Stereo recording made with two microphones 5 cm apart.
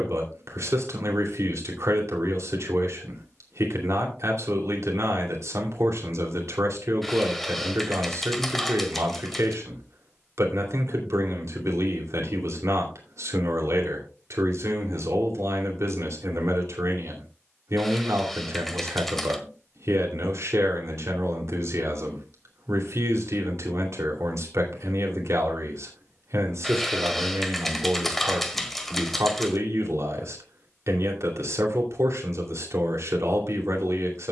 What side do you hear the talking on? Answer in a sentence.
In this clip you hear the talking on the right.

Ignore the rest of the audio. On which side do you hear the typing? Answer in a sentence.
In this clip you hear the typing in the centre.